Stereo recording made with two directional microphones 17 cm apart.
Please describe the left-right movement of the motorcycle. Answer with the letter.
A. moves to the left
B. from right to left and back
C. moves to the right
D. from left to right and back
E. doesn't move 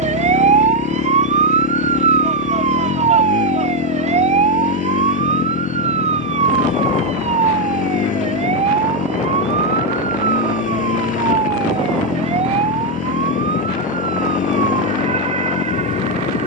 E.